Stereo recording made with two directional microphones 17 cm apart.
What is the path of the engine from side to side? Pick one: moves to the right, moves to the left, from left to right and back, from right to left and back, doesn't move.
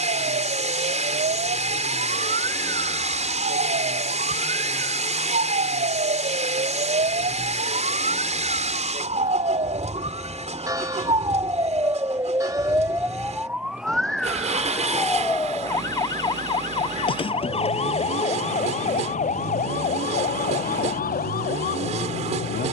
doesn't move.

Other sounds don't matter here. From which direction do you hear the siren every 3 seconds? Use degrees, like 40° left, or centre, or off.
60° right, 60° right, 50° right, 30° right, 10° right, 30° left, 50° left, 60° left.